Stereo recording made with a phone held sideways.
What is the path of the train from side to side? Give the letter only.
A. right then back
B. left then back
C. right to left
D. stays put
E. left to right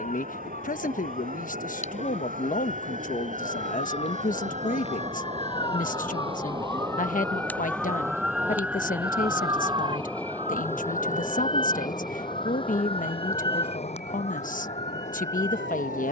C.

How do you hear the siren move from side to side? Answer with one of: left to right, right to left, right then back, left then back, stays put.
left to right.